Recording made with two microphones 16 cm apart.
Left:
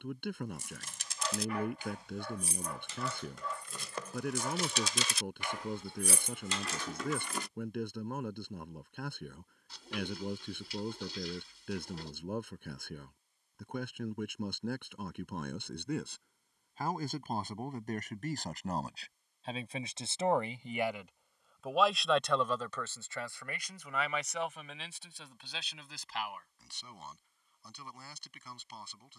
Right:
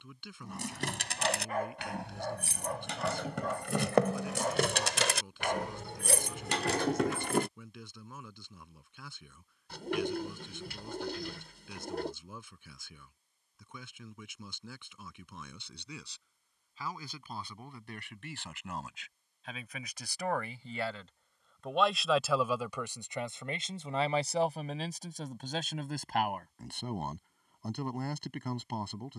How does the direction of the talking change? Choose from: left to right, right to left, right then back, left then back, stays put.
left to right.